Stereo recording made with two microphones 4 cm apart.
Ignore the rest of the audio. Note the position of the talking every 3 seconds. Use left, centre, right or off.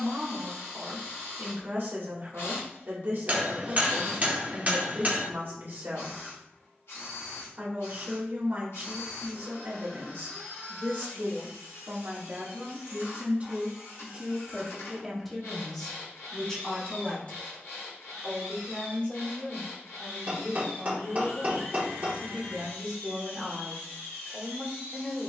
right, right, right, right, right, centre, left, left, left.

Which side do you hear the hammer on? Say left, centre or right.
right.